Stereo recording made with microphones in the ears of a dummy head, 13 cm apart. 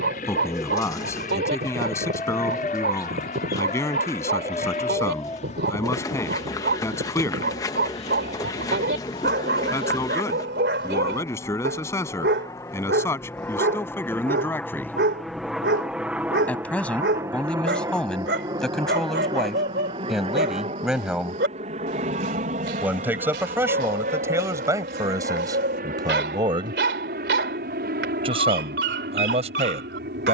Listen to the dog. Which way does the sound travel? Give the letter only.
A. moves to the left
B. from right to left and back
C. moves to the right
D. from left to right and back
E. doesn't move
E.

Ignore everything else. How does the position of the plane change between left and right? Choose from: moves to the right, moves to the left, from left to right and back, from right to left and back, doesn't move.
moves to the right.